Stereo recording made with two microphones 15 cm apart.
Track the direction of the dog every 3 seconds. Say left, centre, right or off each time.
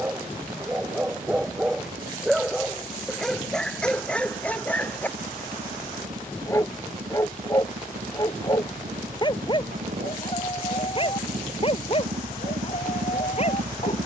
centre, centre, left, left, left.